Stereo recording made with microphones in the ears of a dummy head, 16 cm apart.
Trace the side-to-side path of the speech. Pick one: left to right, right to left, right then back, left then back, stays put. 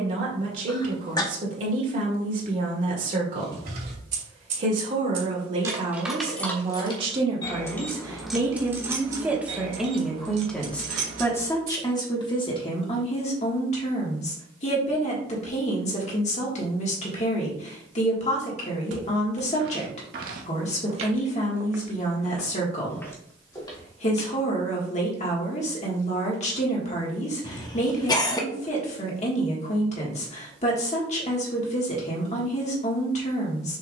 right to left.